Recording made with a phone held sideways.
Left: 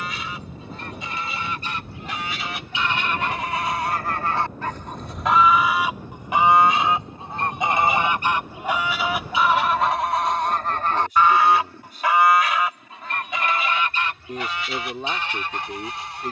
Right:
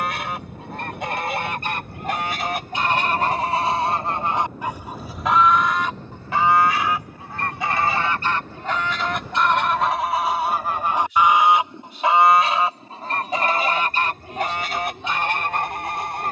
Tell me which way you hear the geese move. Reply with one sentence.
You can hear the geese move from right to left and back again.